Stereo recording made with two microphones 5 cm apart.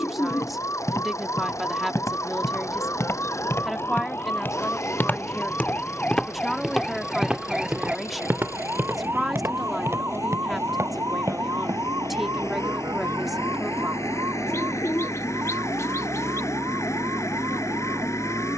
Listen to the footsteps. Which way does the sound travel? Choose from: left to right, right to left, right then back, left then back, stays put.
left to right.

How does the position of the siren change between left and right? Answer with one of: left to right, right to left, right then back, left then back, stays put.
left to right.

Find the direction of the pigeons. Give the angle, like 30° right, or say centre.
70° left.